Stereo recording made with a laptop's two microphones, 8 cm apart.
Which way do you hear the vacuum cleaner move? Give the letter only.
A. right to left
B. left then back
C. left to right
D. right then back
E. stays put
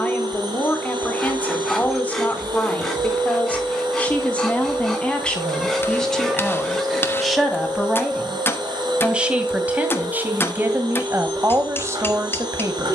E.